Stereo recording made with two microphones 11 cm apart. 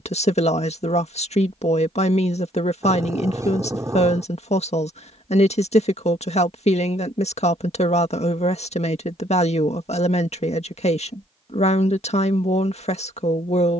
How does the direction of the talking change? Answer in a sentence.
You can hear the talking stay put.